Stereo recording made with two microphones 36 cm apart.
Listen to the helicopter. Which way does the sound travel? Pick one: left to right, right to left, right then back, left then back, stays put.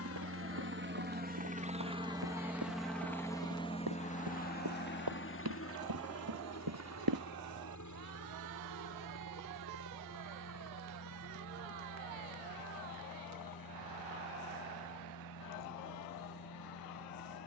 right to left.